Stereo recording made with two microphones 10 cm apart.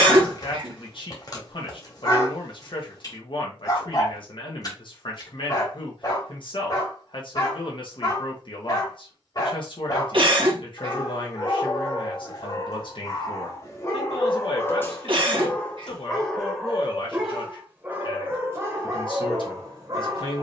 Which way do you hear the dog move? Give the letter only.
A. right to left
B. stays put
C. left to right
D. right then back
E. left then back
C.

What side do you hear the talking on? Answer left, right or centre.
left.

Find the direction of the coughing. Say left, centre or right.
right.